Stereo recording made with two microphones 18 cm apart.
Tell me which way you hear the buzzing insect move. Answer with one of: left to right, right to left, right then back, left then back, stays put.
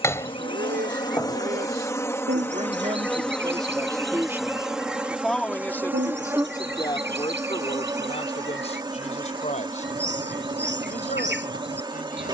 left to right.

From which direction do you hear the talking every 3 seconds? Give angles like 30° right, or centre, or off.
50° right, 10° right, 30° left, 40° left.